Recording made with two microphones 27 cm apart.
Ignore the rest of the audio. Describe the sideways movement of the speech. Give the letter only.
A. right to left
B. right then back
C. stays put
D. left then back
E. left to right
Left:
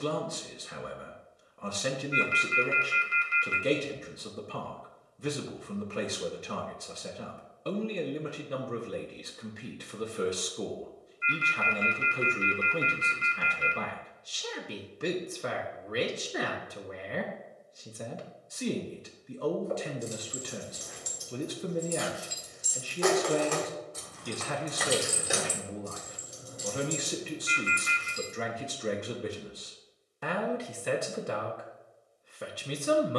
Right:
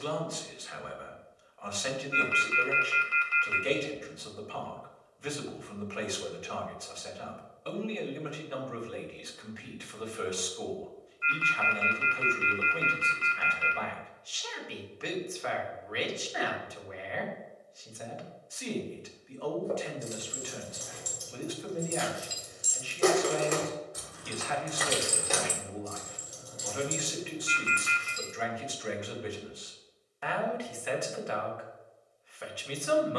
C.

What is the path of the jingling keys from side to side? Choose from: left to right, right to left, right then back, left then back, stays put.
right to left.